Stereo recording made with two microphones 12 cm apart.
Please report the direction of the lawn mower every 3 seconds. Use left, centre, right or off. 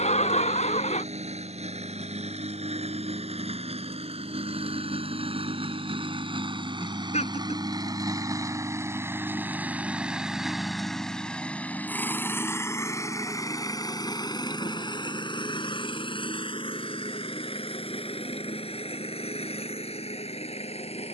right, right, right, centre, left, left, left.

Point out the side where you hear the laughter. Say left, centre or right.
left.